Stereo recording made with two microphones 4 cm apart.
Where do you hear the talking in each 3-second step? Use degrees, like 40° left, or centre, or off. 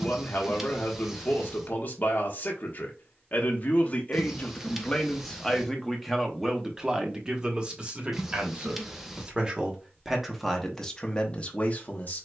50° left, 20° left, 20° right, 10° left.